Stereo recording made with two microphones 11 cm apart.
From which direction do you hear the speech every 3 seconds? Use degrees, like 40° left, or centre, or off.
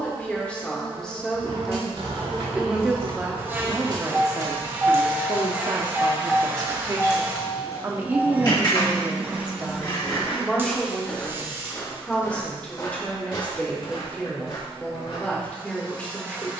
centre, 30° right, 30° right, centre, 10° left, 10° left.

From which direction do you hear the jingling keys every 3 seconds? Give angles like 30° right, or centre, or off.
60° right, 30° right, 30° left, 50° left, off, off.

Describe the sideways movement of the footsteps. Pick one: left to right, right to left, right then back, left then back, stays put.
right to left.